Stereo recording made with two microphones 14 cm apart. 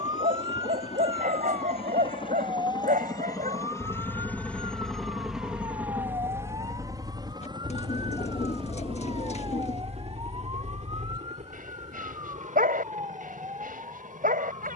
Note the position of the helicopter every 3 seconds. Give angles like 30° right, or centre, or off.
40° left, 10° left, 30° right, 50° right, 60° right.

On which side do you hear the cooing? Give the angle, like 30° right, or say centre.
50° left.